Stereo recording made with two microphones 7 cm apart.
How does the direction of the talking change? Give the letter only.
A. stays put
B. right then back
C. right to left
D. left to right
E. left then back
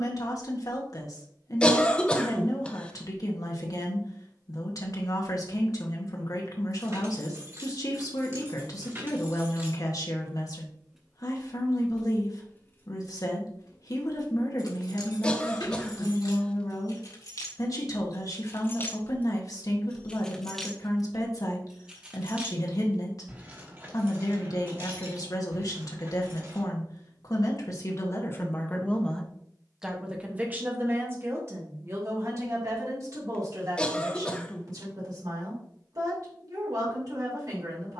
D.